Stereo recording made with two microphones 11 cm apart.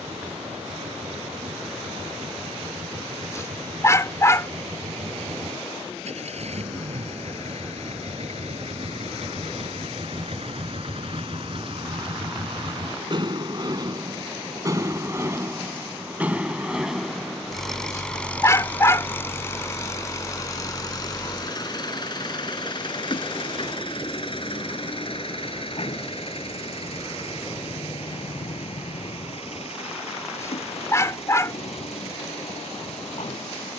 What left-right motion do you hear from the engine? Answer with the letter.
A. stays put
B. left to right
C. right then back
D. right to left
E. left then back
D.